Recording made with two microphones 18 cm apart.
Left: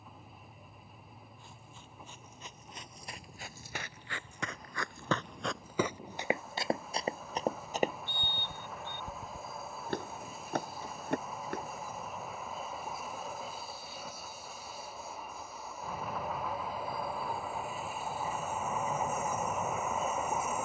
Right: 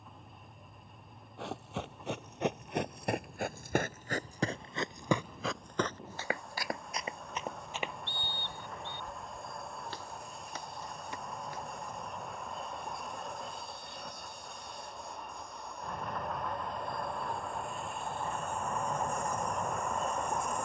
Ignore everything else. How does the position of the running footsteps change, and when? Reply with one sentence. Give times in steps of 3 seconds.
In this clip you hear the running footsteps on the right from 0 s, on the left from 6 s and not at all from 12 s.